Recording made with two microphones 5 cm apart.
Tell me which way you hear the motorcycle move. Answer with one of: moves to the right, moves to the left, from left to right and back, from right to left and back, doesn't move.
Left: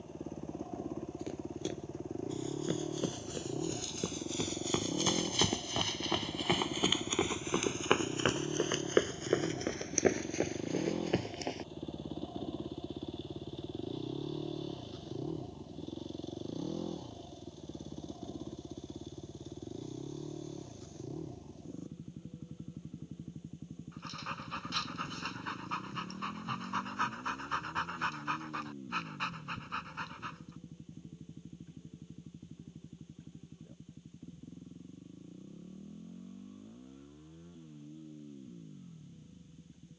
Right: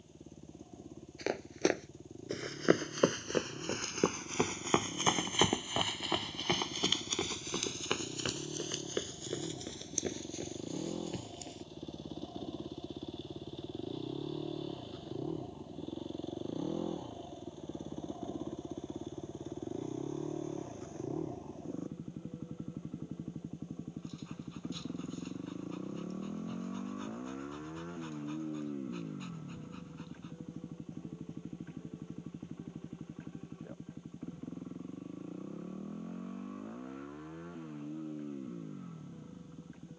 moves to the right.